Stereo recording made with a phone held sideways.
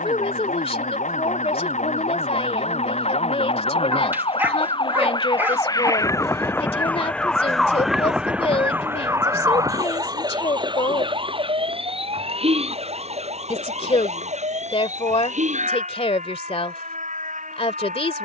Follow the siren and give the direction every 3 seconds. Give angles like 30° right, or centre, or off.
60° left, 40° left, centre, 30° right, 50° right, 60° right.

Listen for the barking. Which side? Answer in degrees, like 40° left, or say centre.
10° right.